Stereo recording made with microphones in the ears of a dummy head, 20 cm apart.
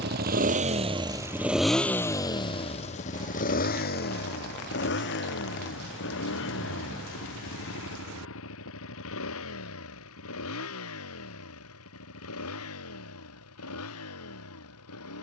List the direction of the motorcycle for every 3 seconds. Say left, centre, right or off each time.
centre, left, left, left, left.